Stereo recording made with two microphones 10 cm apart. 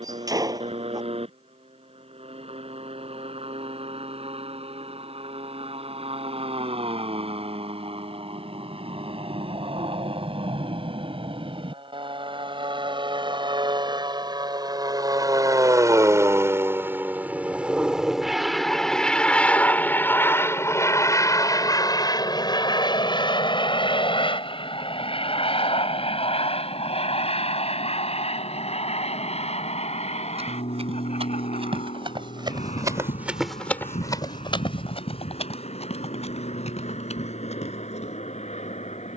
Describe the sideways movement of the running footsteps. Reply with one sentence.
In this clip you hear the running footsteps go from the right side to the left.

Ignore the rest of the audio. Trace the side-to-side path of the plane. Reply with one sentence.
You can hear the plane travel towards the left.